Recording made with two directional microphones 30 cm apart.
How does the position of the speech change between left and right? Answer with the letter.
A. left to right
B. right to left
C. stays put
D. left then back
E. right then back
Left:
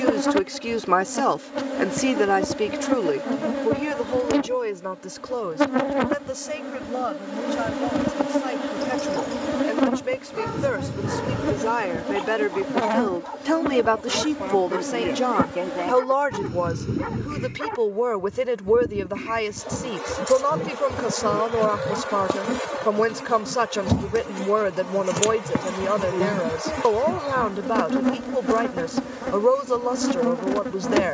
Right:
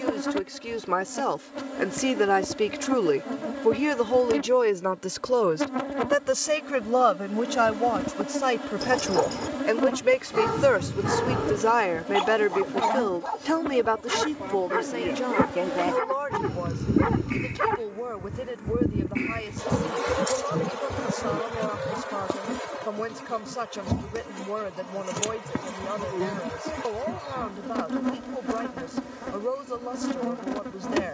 E.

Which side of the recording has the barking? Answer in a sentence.
In this clip you hear the barking on the right.